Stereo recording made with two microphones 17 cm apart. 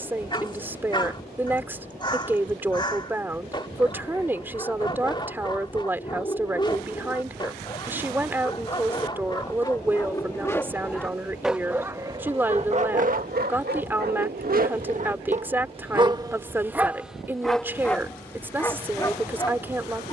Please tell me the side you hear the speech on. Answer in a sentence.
You can hear the speech in the centre.